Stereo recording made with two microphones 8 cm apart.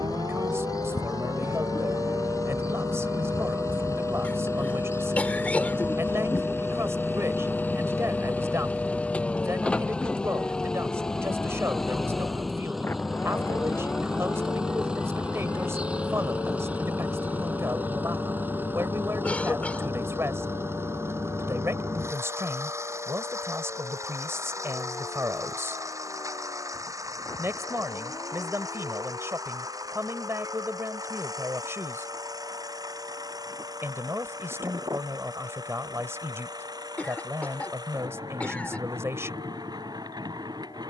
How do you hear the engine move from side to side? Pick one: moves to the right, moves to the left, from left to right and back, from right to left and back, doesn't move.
moves to the right.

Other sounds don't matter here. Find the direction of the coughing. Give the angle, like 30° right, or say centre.
20° left.